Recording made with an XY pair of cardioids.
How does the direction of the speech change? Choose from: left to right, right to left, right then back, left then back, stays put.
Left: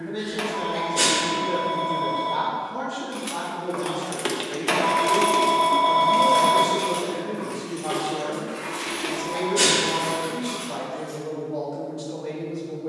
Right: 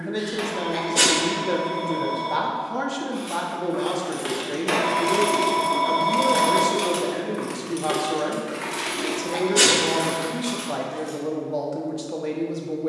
stays put.